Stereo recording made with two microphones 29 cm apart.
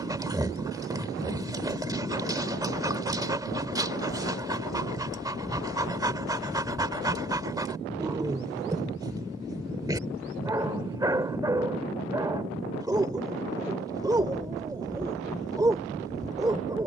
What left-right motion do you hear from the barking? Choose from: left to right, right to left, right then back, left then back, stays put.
stays put.